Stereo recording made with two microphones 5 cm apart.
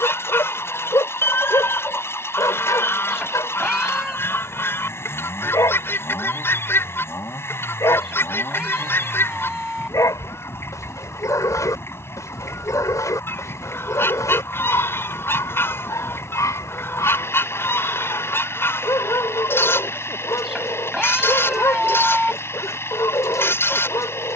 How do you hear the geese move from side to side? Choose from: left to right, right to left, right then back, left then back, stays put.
stays put.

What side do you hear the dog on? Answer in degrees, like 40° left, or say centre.
80° left.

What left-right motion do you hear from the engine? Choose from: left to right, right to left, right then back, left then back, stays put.
stays put.